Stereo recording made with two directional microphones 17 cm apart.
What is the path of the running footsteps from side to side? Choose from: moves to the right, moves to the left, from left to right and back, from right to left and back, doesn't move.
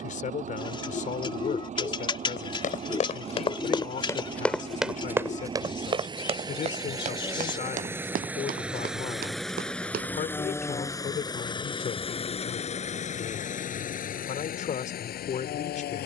moves to the right.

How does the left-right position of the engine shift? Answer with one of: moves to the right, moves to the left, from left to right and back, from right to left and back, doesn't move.
moves to the left.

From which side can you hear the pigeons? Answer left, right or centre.
left.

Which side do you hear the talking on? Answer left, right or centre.
left.